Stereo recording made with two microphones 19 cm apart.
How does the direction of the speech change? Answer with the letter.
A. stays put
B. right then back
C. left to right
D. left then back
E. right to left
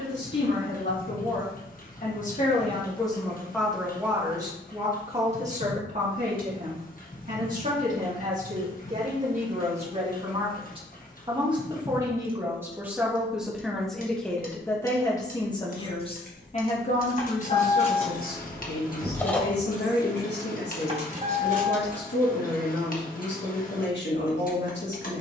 B.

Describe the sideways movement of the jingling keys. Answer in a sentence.
In this clip you hear the jingling keys travel towards the right.